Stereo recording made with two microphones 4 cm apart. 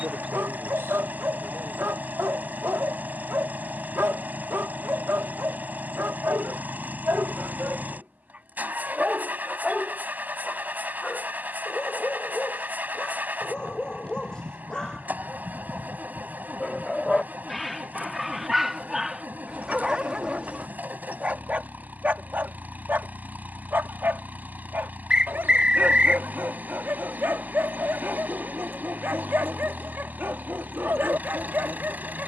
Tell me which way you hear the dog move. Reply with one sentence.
In this clip you hear the dog move from right to left and back again.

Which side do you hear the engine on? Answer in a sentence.
You can hear the engine on the right.